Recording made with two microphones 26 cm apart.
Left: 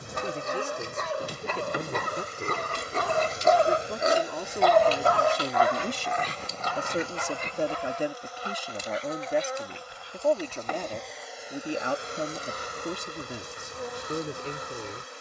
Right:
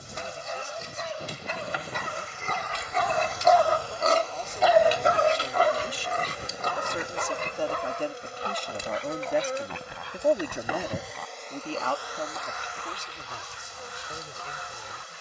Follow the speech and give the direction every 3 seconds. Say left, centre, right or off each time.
left, left, left, centre, left.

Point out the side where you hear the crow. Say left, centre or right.
left.